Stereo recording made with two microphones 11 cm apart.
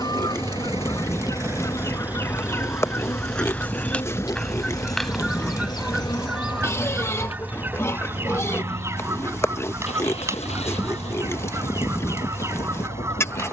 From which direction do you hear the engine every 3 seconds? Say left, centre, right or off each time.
right, left, left, left, left.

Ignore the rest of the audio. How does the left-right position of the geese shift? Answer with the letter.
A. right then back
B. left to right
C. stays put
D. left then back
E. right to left
B.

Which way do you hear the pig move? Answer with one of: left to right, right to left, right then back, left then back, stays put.
stays put.